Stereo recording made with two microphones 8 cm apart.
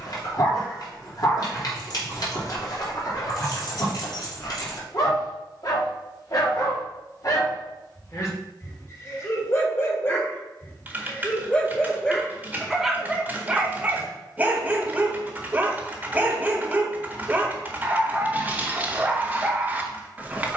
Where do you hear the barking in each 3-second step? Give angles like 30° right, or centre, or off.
50° left, 50° left, 50° left, 20° left, 10° right, 20° right, 20° right.